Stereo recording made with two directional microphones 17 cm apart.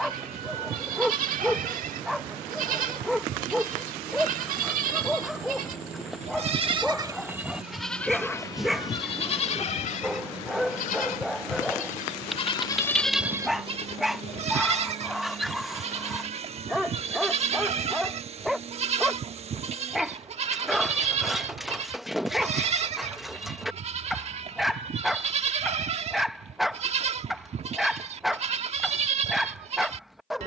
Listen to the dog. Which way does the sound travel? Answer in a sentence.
In this clip you hear the dog stay put.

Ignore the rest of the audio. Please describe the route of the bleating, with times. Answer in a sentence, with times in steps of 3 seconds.
You can hear the bleating on the right from 0 s, in the centre from 6 s, on the left from 9 s, in the centre from 12 s and on the right from 15 s.